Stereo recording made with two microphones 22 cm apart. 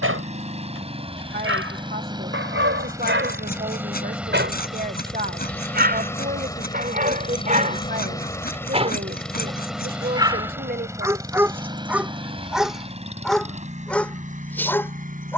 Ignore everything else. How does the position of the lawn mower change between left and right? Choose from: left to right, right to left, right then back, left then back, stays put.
left then back.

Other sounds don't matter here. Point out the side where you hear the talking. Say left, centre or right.
right.